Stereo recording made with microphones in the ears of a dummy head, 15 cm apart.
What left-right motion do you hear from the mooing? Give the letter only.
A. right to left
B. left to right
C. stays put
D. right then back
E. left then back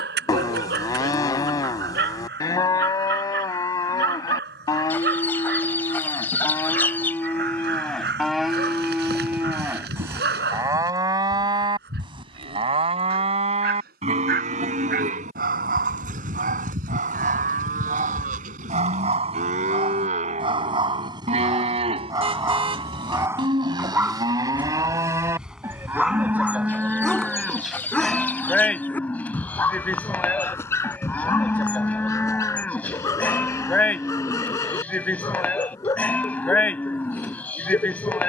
D.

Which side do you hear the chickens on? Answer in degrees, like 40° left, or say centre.
10° left.